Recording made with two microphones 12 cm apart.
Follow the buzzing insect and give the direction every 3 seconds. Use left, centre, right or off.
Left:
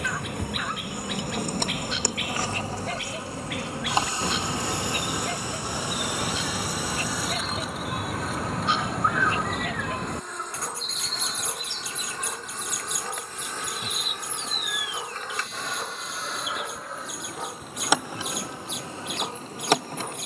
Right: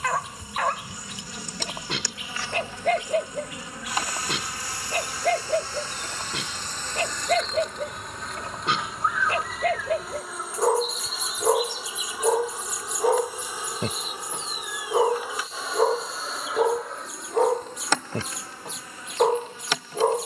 left, left, centre, centre, centre, centre, left.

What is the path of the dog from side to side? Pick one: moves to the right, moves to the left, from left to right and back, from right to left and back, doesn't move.
doesn't move.